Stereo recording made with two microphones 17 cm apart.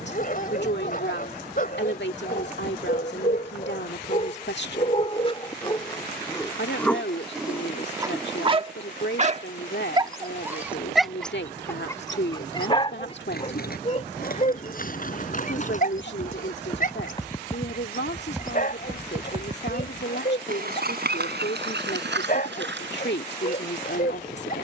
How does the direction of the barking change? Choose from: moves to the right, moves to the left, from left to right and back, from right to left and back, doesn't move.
from left to right and back.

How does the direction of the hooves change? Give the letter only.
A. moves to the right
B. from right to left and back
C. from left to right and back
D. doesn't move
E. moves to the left
A.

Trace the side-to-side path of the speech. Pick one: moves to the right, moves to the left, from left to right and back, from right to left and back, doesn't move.
doesn't move.